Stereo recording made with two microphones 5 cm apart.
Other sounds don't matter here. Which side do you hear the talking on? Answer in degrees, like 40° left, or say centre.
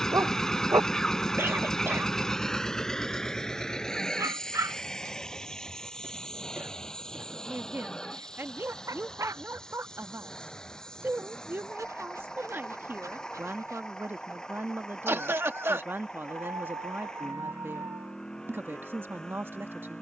40° right.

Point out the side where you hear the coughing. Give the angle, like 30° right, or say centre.
50° right.